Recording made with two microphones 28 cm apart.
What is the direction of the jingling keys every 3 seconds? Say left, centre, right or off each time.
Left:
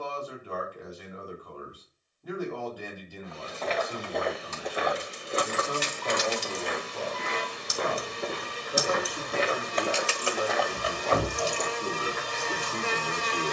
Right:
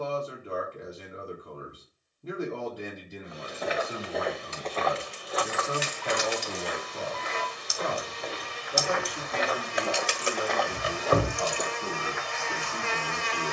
off, left, left, right, off.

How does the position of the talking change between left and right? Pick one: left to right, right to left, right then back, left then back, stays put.
right to left.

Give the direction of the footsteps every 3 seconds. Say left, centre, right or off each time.
off, centre, left, centre, off.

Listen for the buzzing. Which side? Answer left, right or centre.
left.